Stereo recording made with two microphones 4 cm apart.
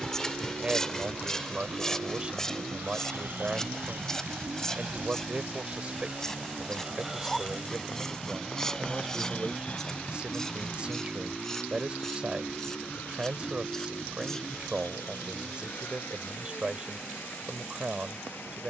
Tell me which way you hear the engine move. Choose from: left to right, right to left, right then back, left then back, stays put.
right to left.